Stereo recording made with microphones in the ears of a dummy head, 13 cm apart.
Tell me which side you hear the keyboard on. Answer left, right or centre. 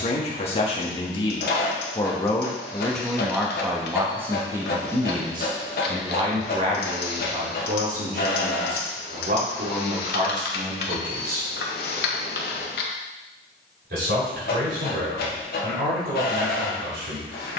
left.